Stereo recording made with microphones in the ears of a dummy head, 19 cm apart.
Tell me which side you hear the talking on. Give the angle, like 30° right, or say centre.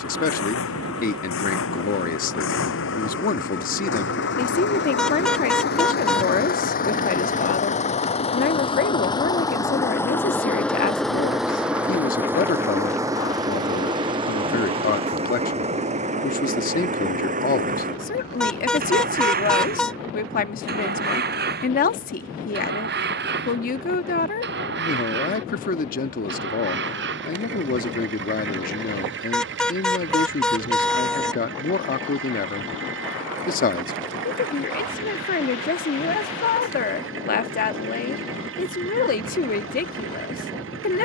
40° left.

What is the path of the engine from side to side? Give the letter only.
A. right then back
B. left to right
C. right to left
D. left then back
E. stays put
B.